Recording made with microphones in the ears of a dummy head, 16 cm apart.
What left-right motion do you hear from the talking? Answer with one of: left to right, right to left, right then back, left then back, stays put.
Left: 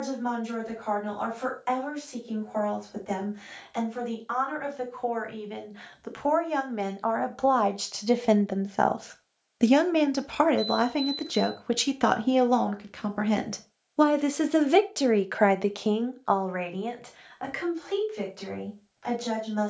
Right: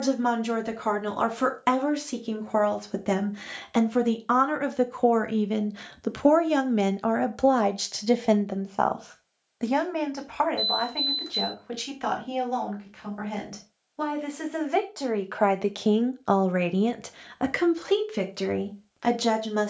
left then back.